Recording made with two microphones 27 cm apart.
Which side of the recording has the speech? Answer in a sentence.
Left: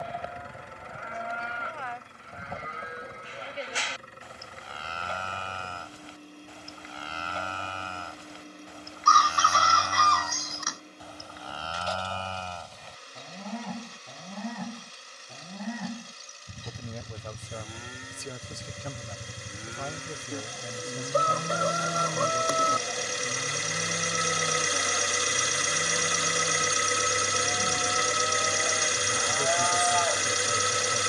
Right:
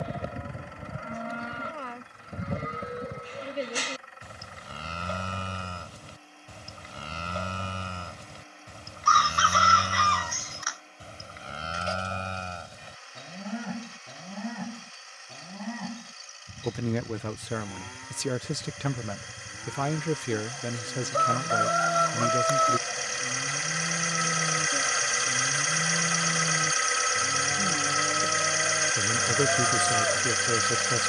You can hear the speech on the right.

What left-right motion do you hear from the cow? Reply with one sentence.
In this clip you hear the cow move from right to left and back again.